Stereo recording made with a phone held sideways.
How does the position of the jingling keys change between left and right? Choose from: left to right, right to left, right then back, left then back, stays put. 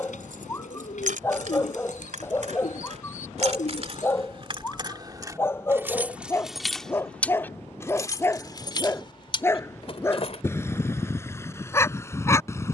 right to left.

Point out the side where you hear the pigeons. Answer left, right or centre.
left.